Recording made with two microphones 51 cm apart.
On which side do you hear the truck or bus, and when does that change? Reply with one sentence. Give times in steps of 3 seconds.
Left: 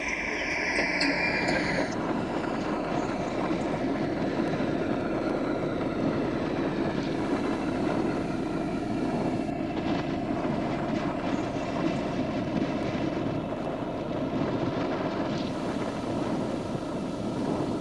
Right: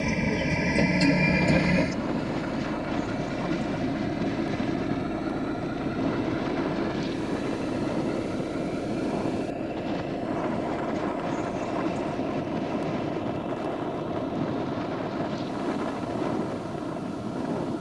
You can hear the truck or bus on the right from 0 s, in the centre from 6 s and on the left from 9 s.